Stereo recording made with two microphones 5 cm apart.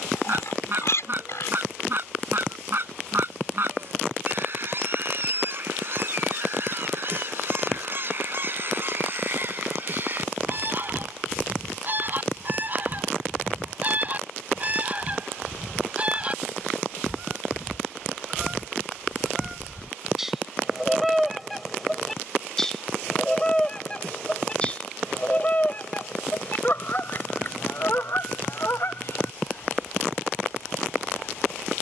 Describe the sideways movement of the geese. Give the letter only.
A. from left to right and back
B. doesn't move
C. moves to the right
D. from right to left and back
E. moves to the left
E.